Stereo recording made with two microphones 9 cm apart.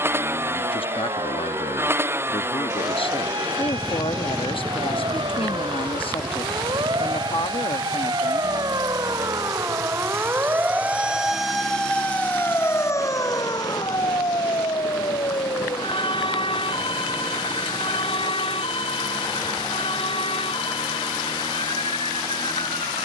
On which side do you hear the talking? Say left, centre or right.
left.